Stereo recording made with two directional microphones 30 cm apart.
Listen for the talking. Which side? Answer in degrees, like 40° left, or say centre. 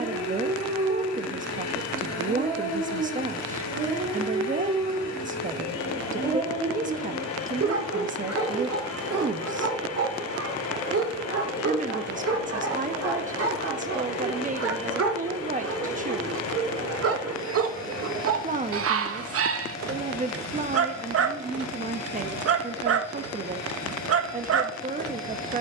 30° right.